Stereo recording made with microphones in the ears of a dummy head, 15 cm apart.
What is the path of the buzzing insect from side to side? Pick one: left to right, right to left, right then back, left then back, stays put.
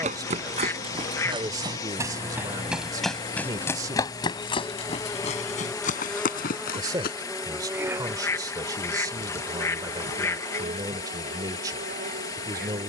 left to right.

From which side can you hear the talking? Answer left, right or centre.
right.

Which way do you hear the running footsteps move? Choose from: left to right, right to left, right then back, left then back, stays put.
right to left.